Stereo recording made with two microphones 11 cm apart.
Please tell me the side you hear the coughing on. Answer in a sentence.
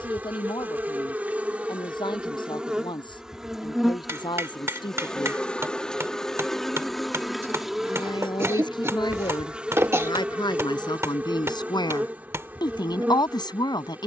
In this clip you hear the coughing on the right.